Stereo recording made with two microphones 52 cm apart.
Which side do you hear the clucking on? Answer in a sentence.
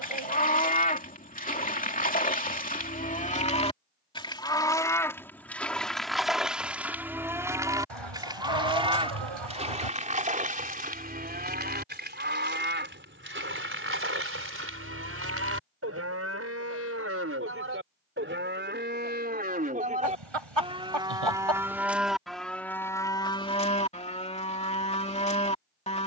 In this clip you hear the clucking on the right.